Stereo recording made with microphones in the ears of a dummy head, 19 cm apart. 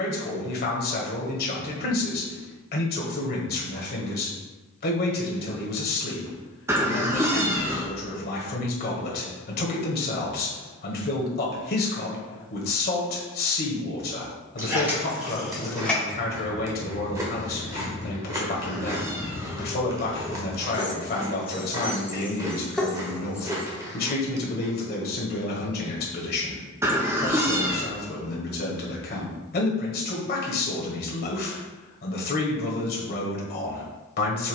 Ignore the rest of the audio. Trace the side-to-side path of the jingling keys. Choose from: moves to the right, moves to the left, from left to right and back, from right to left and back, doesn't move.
from right to left and back.